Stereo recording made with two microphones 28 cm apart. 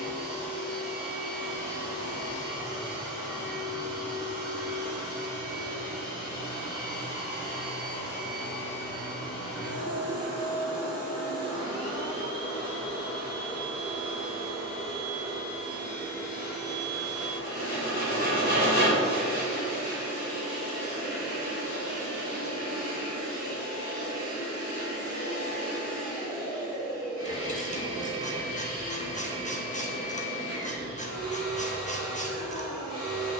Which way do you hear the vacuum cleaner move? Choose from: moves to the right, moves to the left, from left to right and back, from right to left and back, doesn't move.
doesn't move.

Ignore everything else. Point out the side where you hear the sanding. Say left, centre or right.
left.